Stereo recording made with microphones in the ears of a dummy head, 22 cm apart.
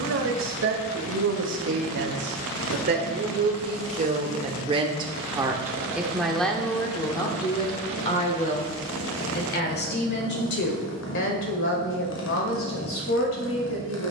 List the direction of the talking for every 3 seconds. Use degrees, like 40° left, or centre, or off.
50° right, 30° right, 20° left, 50° left, 60° left.